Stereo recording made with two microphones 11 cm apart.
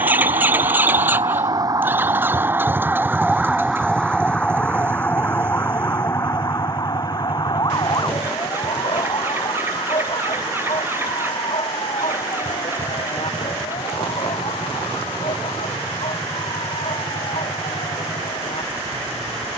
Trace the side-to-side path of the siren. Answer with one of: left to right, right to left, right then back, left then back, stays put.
right to left.